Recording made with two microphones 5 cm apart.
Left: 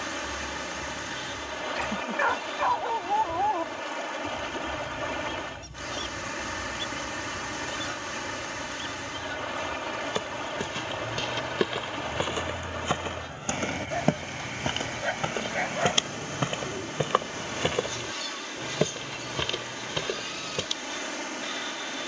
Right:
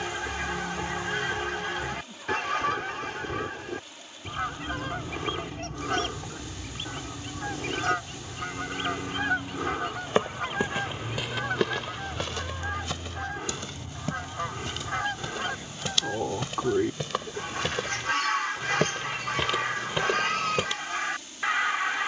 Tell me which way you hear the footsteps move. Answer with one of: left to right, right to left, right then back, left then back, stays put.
left then back.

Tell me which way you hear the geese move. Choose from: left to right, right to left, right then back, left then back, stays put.
stays put.